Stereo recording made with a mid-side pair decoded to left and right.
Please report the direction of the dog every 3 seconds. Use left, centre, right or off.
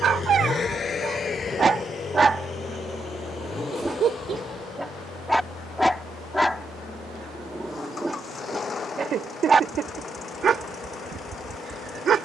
right, centre, centre, right.